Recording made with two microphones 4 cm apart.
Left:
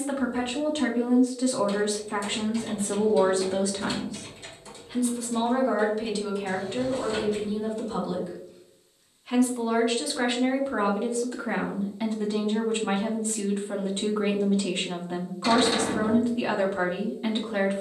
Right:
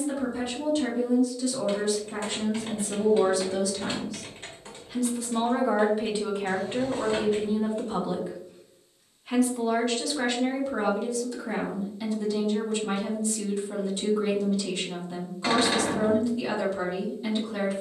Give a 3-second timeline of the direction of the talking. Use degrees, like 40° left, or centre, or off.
50° left, 20° left, 30° right, 20° left, 40° left, 40° left.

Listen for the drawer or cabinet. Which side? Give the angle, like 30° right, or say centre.
40° right.